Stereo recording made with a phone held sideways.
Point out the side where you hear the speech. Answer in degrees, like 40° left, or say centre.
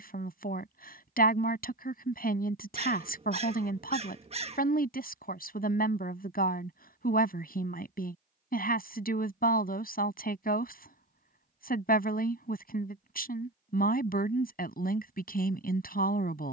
70° left.